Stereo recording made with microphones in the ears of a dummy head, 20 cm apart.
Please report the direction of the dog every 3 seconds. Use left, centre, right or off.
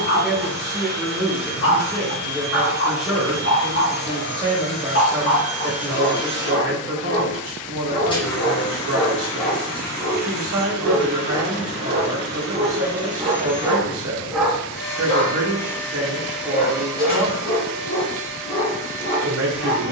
left, left, left, centre, centre, left, left.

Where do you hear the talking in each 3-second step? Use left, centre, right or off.
centre, right, right, right, right, right, right.